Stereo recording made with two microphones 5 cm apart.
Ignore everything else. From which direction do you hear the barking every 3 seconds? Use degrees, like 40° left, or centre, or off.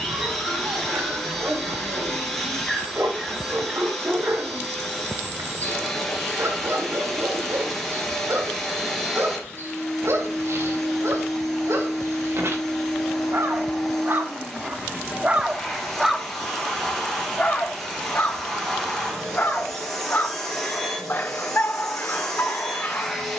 80° right, 80° right, 80° right, 80° right, 70° right, centre, 50° left, 50° left.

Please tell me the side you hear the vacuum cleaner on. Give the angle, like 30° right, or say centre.
10° left.